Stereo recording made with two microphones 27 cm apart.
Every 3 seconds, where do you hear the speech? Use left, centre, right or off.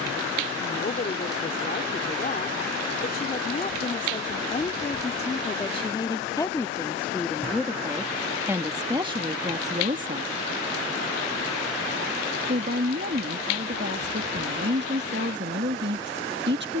left, left, centre, right, right, right.